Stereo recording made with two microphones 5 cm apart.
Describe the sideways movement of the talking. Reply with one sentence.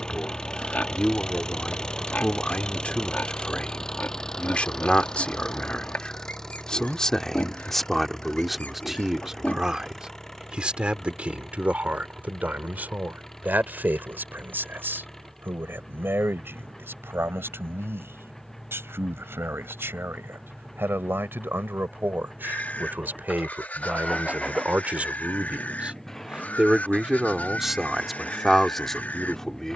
In this clip you hear the talking move from left to right and back again.